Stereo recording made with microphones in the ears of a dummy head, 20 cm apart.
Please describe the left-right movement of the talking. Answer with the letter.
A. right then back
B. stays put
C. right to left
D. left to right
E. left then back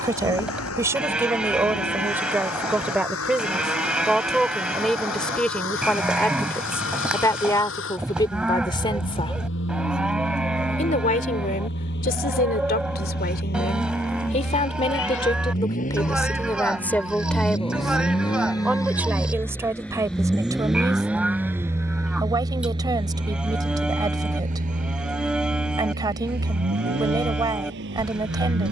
E.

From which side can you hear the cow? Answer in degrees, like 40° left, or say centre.
centre.